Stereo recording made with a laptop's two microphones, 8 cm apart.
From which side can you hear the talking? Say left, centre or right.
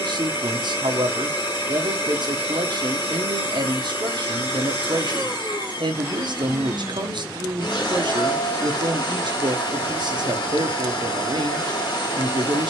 right.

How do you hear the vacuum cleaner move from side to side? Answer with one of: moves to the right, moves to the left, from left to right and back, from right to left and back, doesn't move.
doesn't move.